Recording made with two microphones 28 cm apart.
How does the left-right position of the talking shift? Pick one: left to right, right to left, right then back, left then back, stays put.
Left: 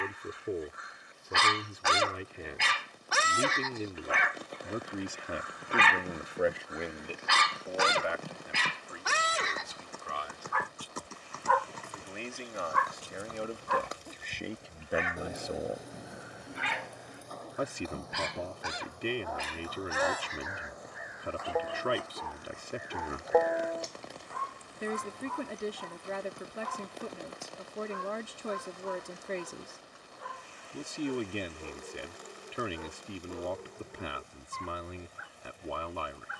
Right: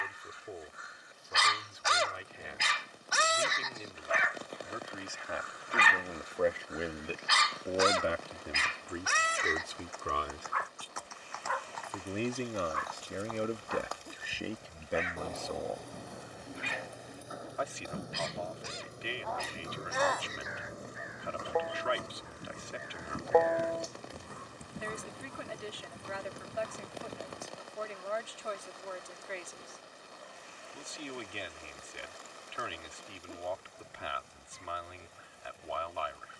right then back.